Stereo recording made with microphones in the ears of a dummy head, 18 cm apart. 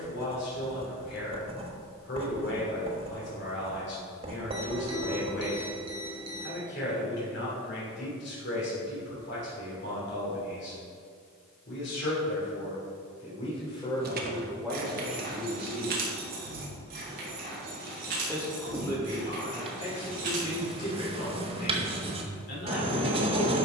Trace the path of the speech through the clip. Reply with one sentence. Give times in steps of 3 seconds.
You can hear the speech on the left from 0 s, in the centre from 15 s and on the left from 18 s.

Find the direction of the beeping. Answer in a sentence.
You can hear the beeping on the right.